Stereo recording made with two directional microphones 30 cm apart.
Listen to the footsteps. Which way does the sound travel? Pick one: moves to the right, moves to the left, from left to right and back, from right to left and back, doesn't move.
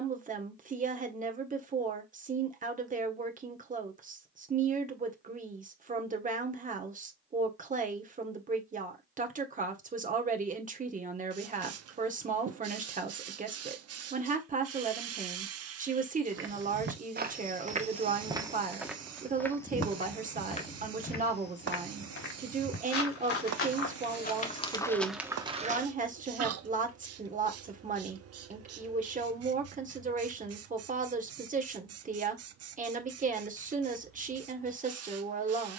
from right to left and back.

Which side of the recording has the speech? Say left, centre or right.
right.